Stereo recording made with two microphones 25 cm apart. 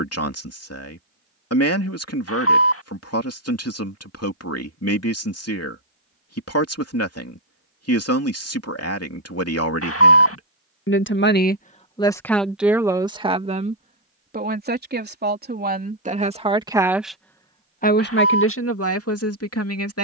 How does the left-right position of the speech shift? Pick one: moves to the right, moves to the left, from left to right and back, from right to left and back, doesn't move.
from left to right and back.